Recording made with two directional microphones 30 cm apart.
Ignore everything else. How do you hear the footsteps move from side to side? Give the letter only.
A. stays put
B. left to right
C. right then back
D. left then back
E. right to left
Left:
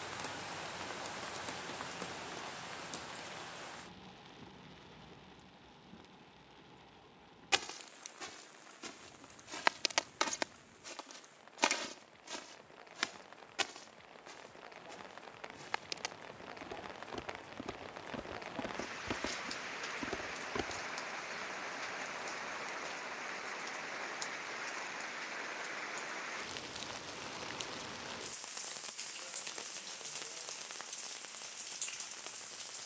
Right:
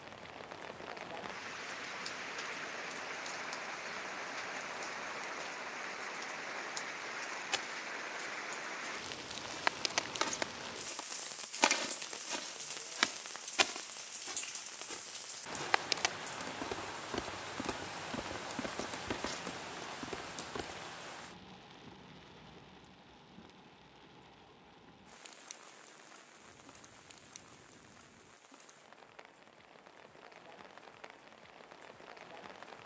C.